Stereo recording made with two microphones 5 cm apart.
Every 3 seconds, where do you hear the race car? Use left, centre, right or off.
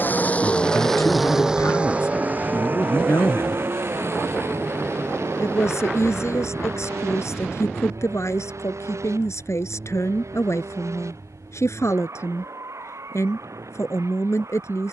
centre, right, right, right, right.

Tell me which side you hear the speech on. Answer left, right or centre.
left.